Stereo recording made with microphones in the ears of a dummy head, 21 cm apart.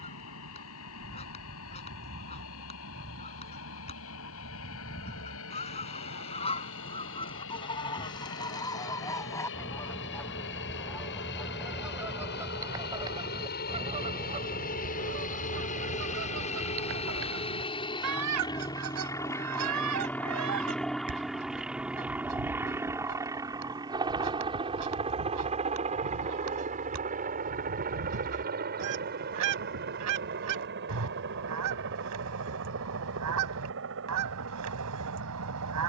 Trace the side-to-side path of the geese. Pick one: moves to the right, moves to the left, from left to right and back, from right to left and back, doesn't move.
moves to the right.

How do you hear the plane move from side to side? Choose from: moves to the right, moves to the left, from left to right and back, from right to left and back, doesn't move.
moves to the right.